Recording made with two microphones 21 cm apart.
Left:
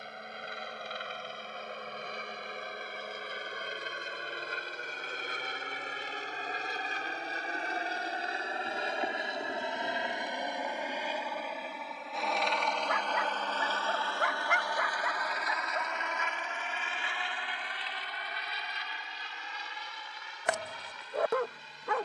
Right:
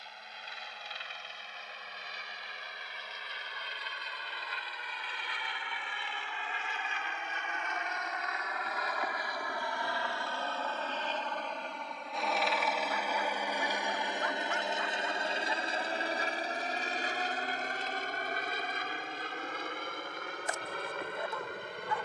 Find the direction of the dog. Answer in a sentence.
You can hear the dog on the left.